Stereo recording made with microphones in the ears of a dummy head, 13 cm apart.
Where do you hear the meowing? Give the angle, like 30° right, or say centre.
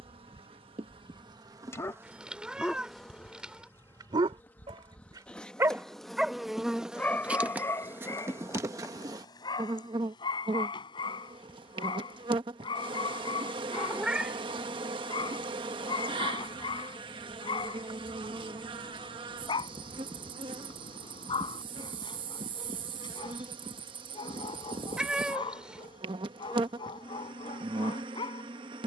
10° right.